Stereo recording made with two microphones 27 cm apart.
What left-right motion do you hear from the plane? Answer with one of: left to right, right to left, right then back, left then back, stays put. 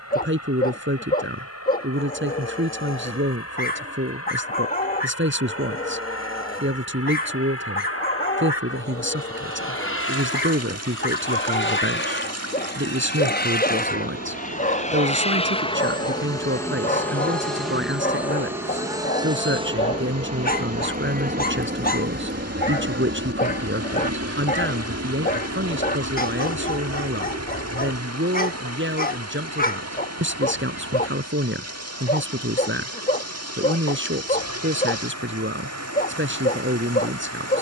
left to right.